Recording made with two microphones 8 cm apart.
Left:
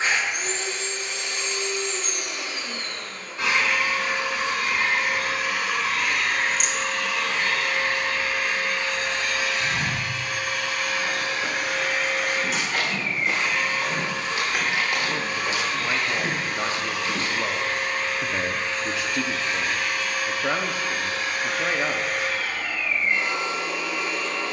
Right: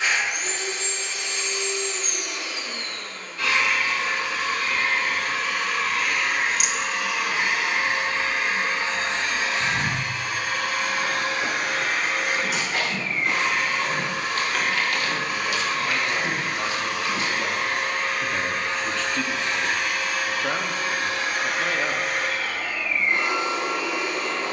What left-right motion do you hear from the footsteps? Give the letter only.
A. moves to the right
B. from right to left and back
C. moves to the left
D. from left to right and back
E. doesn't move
C.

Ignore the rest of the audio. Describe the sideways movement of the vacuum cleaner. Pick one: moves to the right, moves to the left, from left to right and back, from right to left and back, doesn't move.
moves to the right.